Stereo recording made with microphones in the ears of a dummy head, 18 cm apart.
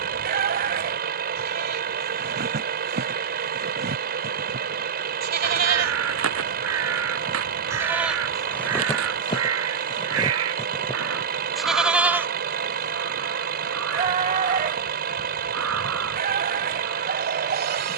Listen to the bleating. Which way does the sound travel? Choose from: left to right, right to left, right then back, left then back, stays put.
left then back.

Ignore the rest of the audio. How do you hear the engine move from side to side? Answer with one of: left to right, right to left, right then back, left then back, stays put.
stays put.